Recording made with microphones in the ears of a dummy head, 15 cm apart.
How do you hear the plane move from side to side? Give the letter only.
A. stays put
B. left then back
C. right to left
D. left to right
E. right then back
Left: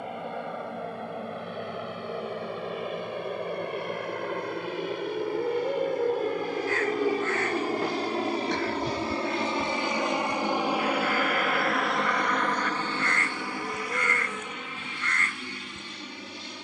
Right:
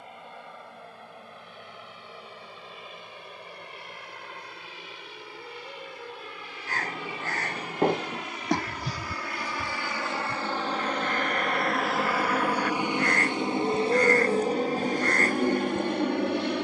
D.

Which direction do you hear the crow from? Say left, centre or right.
right.